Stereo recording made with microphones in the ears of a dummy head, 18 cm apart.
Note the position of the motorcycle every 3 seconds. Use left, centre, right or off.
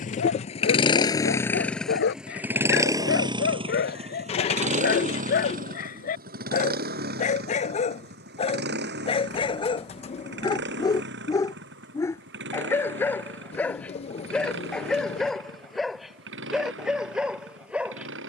centre, right, right, right, right, right.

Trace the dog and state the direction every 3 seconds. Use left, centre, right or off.
left, left, left, left, centre, centre.